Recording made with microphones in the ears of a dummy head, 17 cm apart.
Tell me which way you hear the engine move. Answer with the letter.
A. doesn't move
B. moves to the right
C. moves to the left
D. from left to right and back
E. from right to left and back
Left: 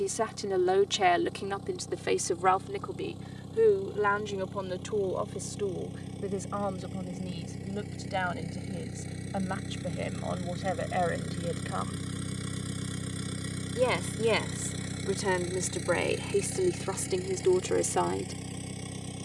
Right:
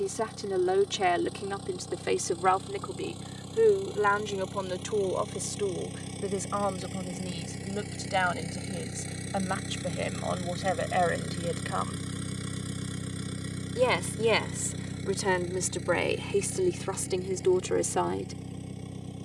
C.